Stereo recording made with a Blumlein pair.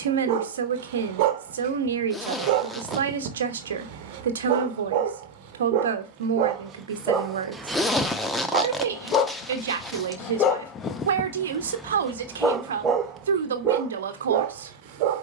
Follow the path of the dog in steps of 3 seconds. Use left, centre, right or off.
right, right, centre, left, right.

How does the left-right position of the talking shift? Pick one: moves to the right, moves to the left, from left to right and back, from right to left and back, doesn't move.
doesn't move.